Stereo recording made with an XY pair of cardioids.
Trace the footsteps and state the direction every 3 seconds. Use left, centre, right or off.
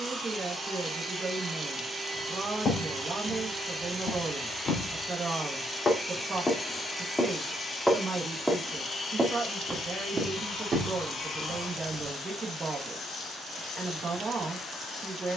left, left, centre, right, off.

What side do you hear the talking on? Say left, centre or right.
right.